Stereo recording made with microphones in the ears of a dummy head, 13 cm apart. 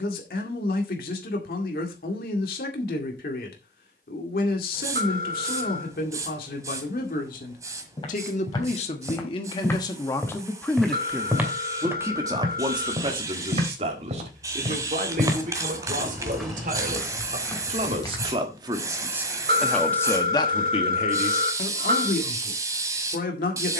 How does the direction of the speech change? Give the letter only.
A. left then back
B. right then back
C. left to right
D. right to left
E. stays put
B.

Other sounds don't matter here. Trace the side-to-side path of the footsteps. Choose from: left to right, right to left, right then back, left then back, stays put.
right then back.